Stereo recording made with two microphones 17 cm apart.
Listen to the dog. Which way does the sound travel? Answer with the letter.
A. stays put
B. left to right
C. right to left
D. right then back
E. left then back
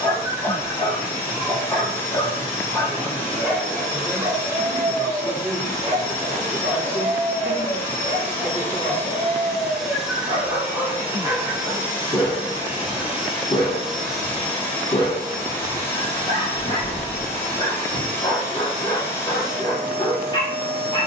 D.